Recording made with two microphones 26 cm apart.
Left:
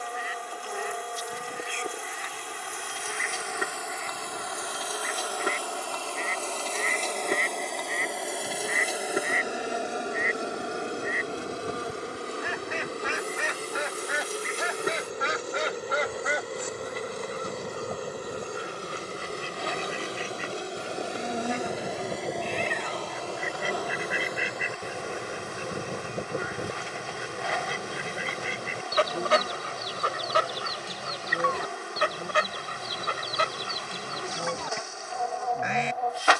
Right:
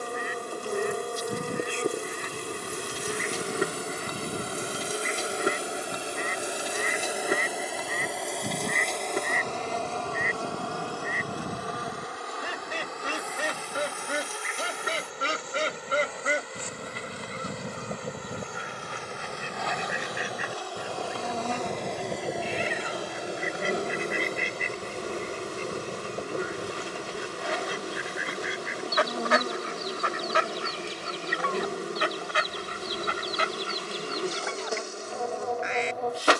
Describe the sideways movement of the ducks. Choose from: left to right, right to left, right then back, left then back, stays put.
right to left.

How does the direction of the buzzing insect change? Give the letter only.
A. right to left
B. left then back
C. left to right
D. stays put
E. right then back
B.